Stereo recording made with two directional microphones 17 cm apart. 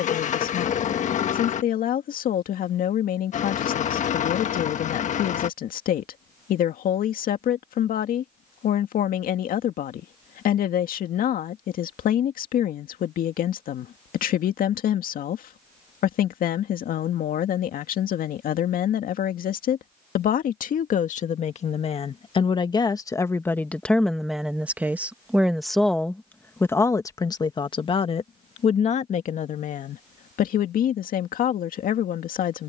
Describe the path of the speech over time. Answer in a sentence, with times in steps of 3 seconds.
In this clip you hear the speech on the left from 0 s, in the centre from 24 s and on the left from 27 s.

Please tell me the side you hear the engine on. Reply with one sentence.
In this clip you hear the engine on the left.